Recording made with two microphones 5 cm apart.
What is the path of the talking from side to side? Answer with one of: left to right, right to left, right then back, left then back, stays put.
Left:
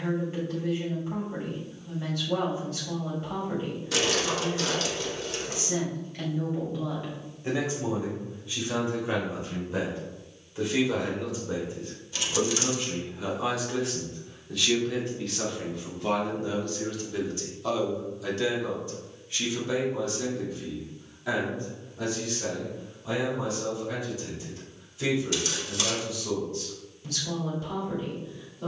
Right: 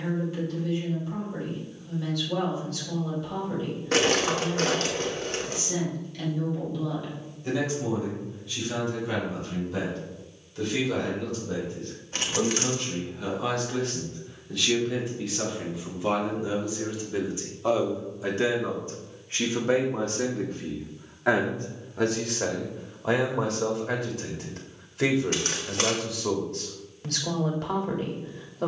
left to right.